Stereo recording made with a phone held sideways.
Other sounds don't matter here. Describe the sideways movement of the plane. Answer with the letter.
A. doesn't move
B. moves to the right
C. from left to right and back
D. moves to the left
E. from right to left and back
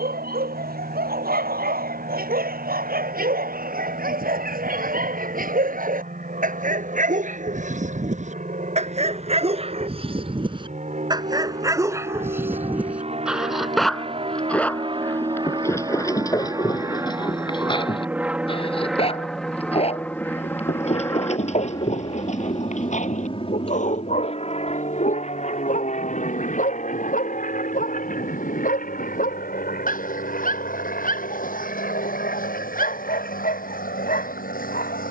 D.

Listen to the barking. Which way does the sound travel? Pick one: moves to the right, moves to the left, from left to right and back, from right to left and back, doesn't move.
moves to the left.